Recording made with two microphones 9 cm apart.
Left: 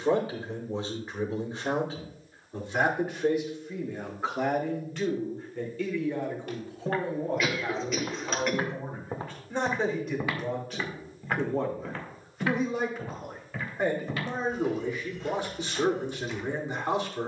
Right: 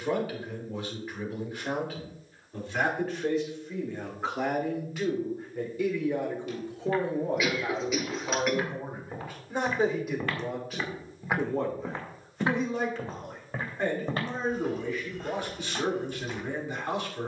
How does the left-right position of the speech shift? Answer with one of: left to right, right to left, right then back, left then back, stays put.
right then back.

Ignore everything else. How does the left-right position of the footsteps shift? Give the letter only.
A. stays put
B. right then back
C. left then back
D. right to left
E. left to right
E.